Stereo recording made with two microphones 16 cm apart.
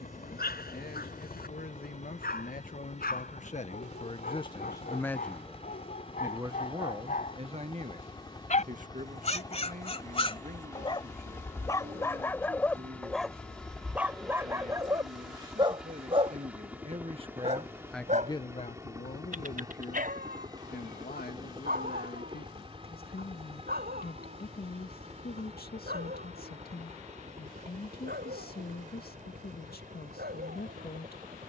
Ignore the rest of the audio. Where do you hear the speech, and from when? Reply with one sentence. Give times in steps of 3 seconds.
In this clip you hear the speech on the left from 0 s, on the right from 6 s and on the left from 18 s.